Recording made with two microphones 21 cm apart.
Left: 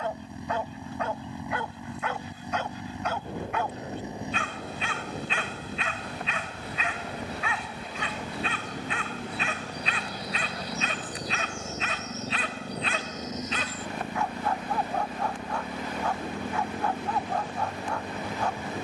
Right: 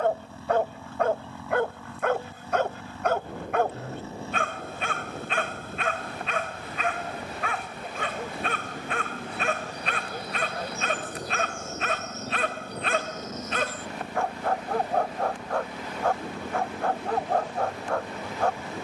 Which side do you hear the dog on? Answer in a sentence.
In this clip you hear the dog on the right.